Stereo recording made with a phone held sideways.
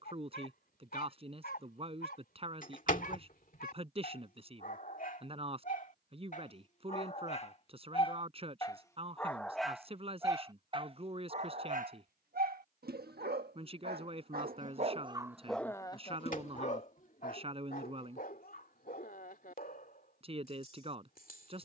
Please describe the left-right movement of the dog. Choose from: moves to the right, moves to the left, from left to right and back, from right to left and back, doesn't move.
from left to right and back.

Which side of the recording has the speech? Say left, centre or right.
right.